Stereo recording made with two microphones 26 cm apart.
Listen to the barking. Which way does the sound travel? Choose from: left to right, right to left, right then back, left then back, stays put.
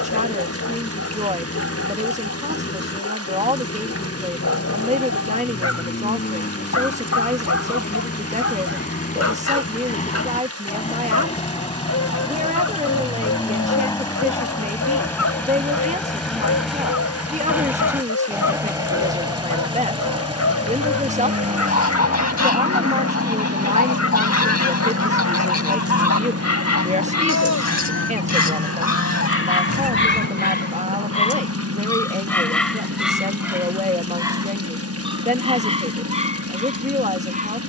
left to right.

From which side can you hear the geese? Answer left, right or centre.
left.